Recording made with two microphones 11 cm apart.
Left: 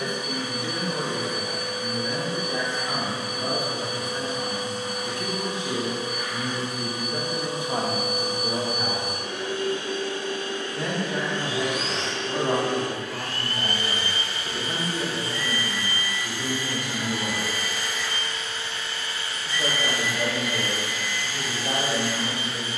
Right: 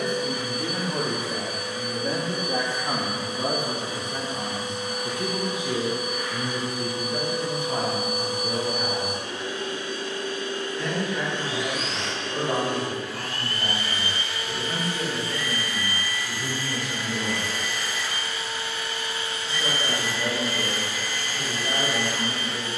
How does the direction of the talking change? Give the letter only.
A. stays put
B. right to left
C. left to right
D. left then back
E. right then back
B.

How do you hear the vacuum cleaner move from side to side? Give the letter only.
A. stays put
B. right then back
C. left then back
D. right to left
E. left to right
E.